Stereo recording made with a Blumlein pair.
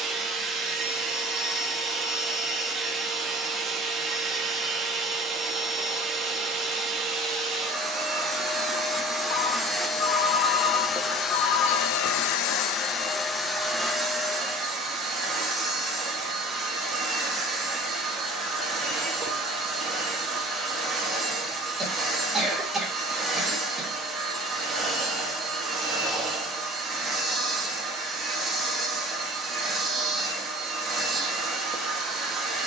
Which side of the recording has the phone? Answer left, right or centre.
left.